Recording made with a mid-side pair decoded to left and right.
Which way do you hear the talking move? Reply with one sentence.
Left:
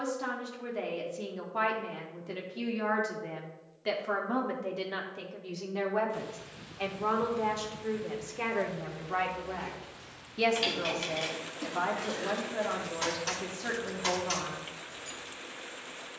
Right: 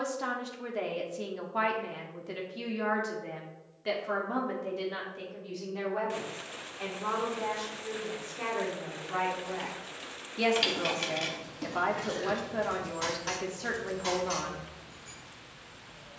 In this clip you hear the talking go left and come back.